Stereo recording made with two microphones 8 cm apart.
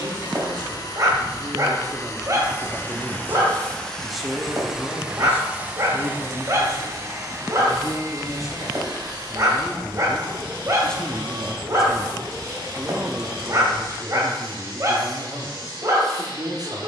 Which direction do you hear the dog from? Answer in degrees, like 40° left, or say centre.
40° right.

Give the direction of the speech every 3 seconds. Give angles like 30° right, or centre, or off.
50° right, 10° left, 40° left, 10° left, 30° right, 50° right.